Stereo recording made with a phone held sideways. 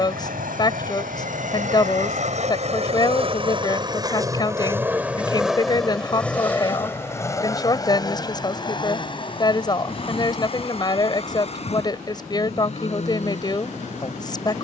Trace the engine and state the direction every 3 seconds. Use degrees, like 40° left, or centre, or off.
60° right, 20° right, 20° left, 40° left, 50° left.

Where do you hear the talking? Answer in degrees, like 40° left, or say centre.
30° left.